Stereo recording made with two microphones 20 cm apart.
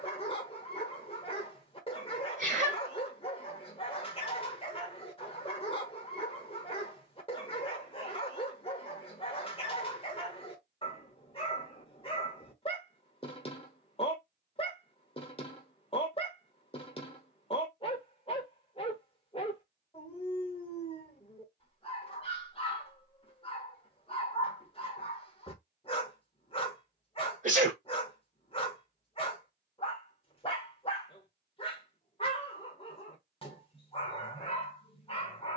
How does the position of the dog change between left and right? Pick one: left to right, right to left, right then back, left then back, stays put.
stays put.